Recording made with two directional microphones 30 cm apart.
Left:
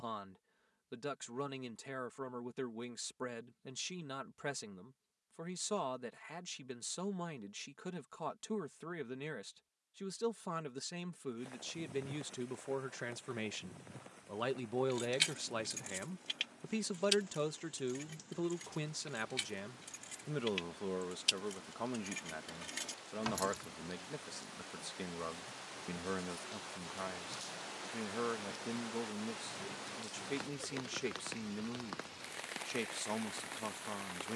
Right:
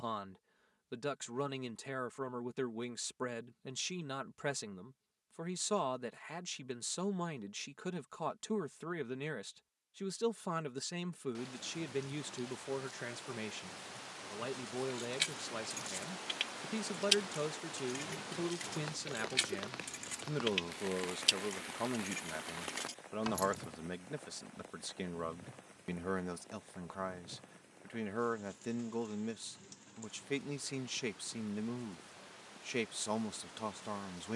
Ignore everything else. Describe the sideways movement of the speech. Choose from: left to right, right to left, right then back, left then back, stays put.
left then back.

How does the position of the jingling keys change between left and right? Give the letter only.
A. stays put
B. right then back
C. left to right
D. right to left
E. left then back
B.